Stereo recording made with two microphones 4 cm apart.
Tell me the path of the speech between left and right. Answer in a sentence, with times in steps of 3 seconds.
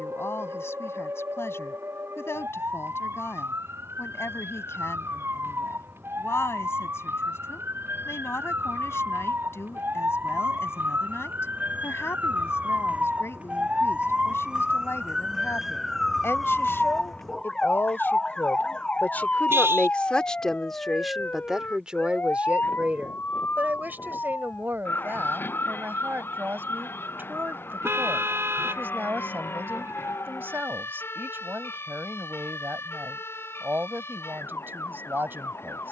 In this clip you hear the speech on the left from 0 s and on the right from 21 s.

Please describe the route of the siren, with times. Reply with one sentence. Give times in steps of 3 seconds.
You can hear the siren on the right from 0 s, in the centre from 15 s and on the left from 18 s.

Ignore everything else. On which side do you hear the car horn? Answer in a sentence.
In this clip you hear the car horn on the right.